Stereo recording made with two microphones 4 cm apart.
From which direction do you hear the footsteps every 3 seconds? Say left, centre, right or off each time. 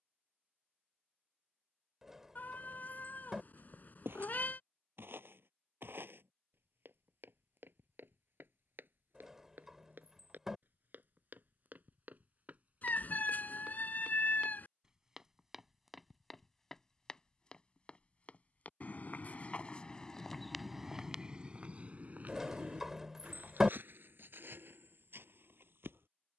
off, right, right, right, right, centre, left, right, right.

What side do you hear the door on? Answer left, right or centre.
centre.